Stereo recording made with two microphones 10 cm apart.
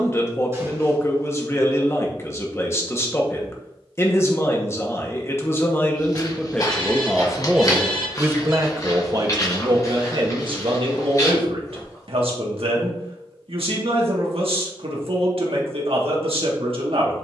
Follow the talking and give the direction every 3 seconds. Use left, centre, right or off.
left, left, centre, right, right, right.